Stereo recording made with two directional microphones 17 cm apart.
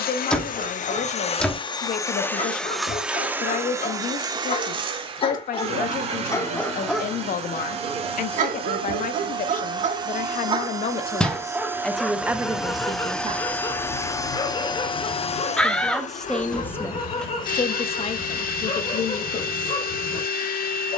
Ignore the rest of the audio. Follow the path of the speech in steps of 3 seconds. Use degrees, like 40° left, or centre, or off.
50° left, 50° left, 50° left, 40° left, 20° right, 10° left, 50° left.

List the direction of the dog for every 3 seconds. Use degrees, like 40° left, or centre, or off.
40° left, 40° left, 20° right, 30° right, 20° left, 40° left, 40° left.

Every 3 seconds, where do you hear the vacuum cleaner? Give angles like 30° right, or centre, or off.
30° left, 20° right, 40° right, 20° right, 10° left, 50° left, 60° left.